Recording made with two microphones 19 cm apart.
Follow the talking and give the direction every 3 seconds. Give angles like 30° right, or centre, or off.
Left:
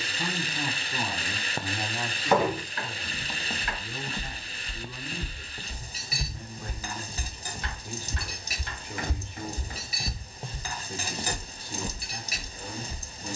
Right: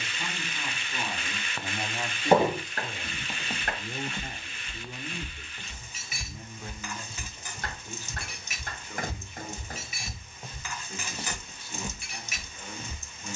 10° left, 30° right, 10° left, 30° left, 30° left.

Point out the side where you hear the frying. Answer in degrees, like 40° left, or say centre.
40° left.